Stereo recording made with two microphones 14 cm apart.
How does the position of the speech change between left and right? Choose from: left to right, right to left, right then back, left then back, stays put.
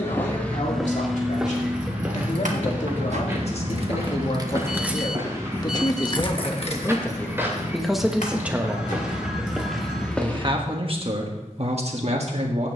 left to right.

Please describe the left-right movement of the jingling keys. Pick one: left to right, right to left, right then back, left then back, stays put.
right to left.